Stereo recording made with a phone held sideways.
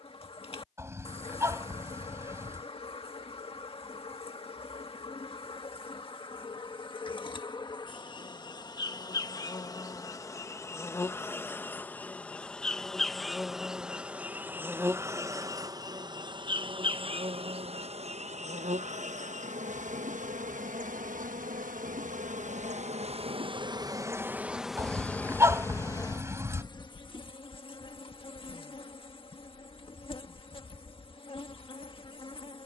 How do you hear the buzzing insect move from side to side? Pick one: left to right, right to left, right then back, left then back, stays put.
right then back.